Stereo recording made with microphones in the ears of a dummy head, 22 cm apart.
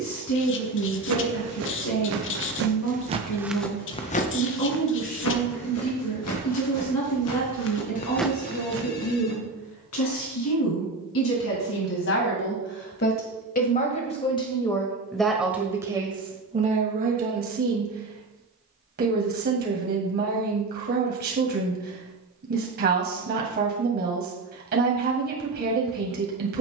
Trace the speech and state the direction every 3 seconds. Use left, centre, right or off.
left, left, left, left, left, right, right, right, right.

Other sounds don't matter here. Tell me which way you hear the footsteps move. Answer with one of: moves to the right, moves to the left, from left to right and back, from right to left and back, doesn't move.
from right to left and back.